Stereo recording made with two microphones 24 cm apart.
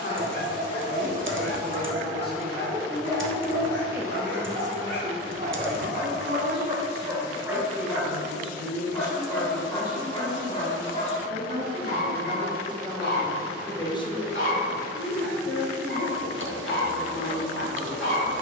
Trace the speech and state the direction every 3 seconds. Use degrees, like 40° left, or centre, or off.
50° left, 20° right, 60° right, 50° right, centre, 60° left.